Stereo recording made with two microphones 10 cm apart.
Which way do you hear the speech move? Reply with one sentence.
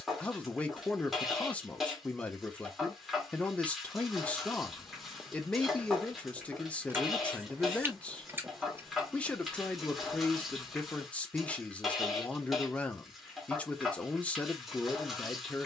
In this clip you hear the speech stay put.